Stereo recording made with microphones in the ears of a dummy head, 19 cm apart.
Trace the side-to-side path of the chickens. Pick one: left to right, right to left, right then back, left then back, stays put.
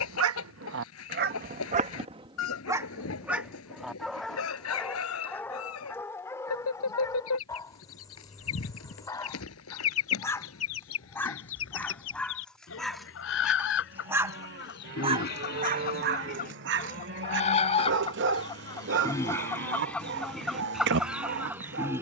left to right.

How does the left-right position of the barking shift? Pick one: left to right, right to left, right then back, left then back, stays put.
left then back.